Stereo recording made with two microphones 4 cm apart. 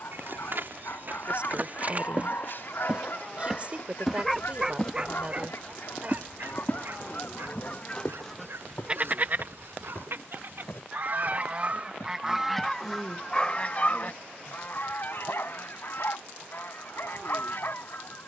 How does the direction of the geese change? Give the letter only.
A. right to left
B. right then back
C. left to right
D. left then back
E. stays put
B.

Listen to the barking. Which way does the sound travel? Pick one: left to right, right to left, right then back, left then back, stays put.
right then back.